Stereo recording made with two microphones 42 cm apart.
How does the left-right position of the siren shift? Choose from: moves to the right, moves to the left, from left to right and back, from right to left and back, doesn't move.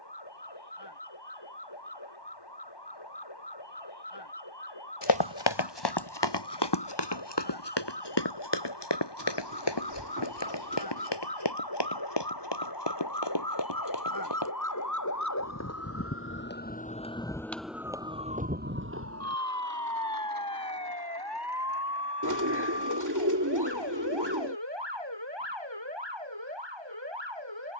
moves to the right.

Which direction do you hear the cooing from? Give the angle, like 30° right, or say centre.
50° right.